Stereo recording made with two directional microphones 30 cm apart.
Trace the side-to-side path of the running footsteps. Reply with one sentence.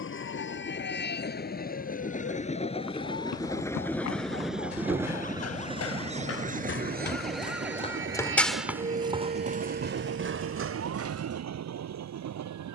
You can hear the running footsteps travel towards the right.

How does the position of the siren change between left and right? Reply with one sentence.
You can hear the siren go from the left side to the right.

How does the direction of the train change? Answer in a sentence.
You can hear the train move to the right.